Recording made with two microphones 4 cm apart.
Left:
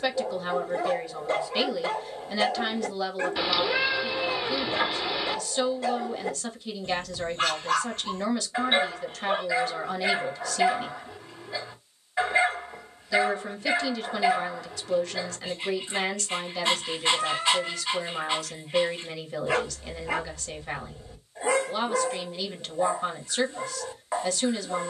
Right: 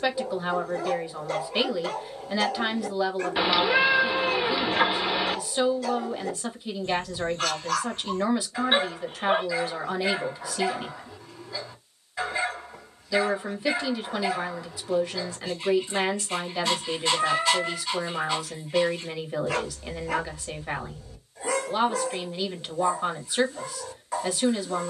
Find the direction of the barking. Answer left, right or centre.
left.